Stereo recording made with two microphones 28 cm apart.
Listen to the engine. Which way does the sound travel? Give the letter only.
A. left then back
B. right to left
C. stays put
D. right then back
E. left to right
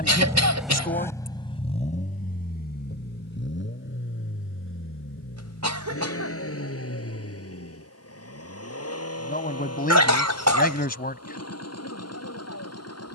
B.